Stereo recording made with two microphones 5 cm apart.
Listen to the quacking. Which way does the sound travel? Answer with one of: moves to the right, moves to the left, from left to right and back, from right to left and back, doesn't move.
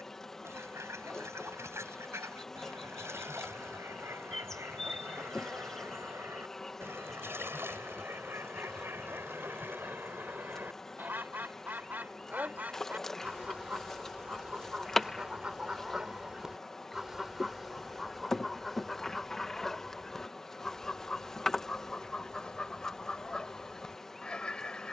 moves to the left.